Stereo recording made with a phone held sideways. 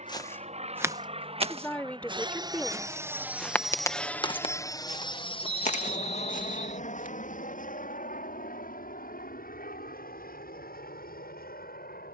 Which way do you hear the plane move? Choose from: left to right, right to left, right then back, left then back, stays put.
right to left.